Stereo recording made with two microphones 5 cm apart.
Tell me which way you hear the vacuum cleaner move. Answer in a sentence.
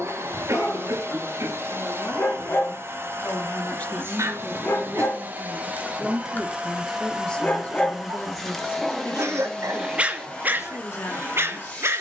In this clip you hear the vacuum cleaner move from right to left.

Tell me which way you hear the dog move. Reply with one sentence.
You can hear the dog move to the right.